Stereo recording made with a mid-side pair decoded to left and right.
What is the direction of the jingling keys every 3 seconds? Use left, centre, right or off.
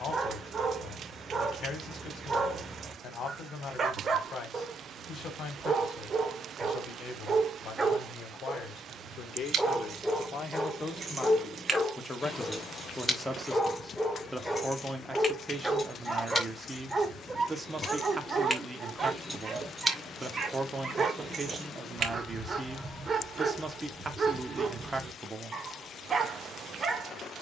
off, off, off, right, centre, left, centre, right, off.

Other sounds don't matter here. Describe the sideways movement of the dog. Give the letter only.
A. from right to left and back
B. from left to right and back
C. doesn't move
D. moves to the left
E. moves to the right
A.